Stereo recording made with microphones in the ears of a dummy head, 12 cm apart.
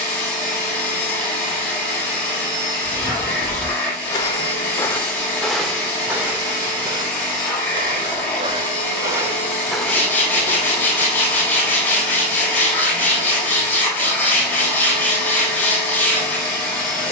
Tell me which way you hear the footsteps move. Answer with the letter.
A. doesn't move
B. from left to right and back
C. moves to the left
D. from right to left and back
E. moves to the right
B.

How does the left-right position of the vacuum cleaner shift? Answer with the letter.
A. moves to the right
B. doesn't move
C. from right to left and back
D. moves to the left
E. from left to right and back
B.